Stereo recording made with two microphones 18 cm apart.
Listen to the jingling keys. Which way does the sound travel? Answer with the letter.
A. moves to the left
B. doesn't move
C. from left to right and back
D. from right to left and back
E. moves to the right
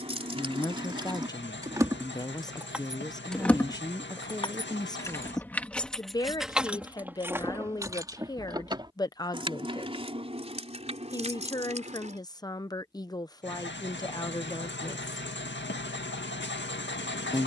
D.